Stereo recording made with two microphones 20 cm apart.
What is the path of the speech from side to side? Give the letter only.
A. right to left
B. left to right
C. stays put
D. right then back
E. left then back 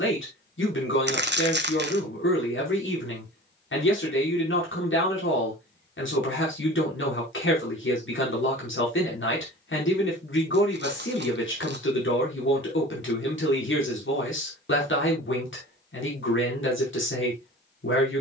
C.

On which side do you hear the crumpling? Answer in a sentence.
In this clip you hear the crumpling on the right.